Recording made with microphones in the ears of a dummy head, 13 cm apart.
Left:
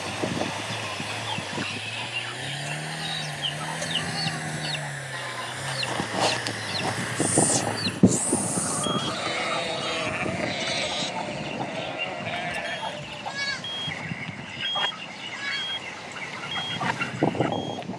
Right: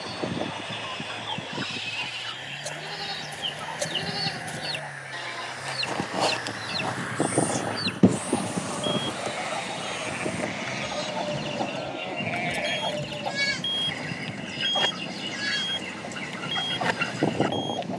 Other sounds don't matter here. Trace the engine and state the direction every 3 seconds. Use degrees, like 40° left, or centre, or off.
40° left, 30° left, 20° left, 10° right, 40° right, 60° right.